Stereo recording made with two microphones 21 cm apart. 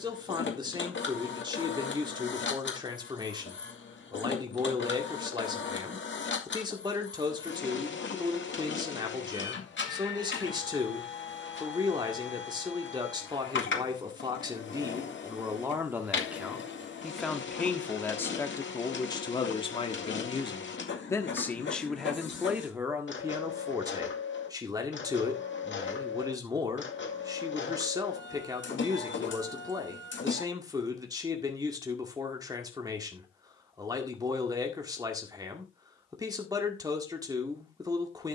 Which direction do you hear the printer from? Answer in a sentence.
In this clip you hear the printer on the left.